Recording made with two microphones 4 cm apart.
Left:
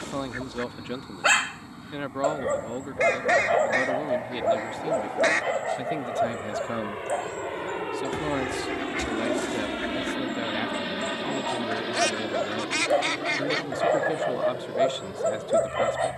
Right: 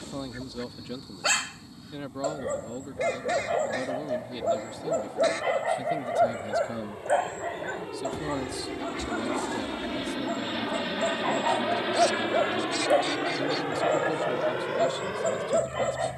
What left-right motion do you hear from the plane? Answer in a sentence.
In this clip you hear the plane travel towards the right.